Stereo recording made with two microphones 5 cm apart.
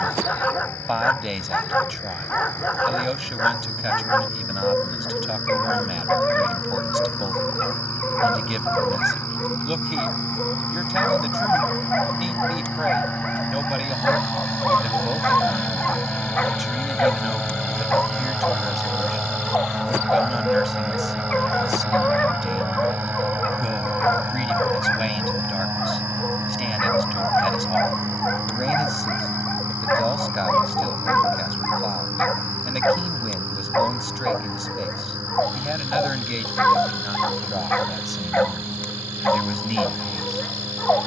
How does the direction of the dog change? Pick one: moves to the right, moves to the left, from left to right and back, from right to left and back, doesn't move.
doesn't move.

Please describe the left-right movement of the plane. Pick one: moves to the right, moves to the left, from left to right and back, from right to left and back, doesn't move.
moves to the right.